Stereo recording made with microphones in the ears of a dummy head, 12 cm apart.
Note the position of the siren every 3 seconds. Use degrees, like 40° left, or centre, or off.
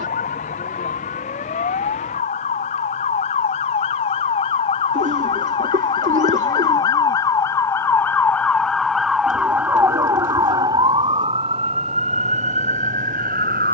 50° left, 40° left, 20° left, 20° right, 50° right.